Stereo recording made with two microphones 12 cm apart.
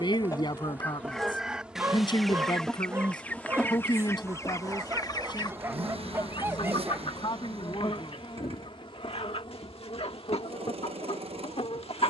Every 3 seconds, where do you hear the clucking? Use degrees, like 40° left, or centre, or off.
10° left, 30° left, 50° left, 60° left.